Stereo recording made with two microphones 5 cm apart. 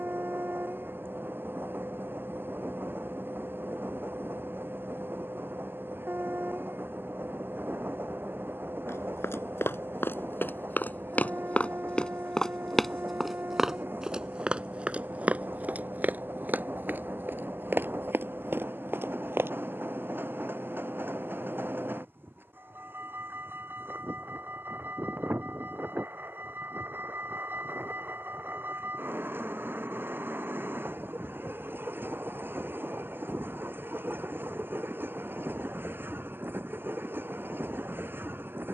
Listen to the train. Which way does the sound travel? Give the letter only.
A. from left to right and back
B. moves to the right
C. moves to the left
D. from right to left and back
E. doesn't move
E.